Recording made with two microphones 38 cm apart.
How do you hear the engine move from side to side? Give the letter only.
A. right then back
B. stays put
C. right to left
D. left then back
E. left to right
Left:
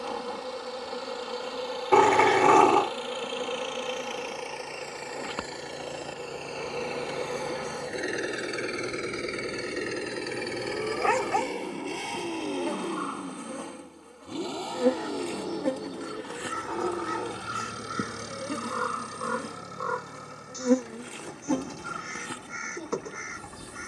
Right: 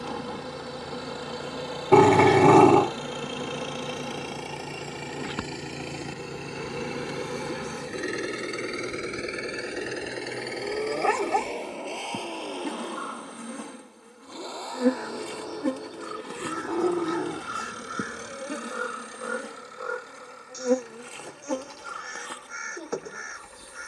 C.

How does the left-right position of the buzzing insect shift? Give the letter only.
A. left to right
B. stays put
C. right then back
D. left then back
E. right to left
E.